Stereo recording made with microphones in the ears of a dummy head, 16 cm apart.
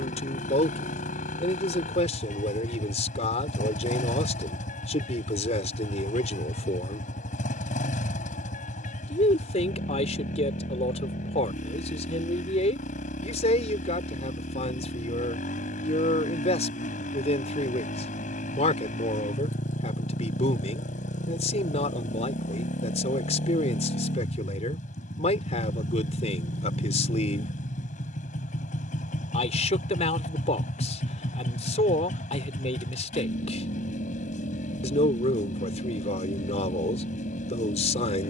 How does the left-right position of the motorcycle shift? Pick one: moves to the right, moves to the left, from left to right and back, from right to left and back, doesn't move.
doesn't move.